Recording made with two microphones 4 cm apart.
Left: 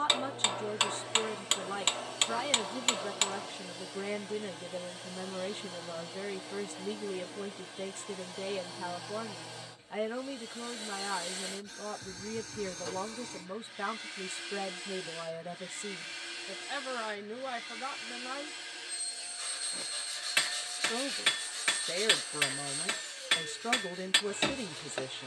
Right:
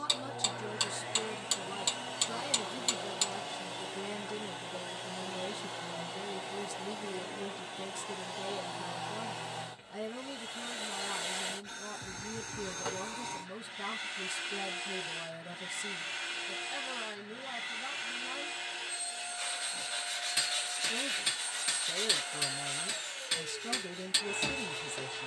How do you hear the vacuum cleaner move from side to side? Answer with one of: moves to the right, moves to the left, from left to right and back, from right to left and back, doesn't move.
doesn't move.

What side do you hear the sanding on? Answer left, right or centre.
right.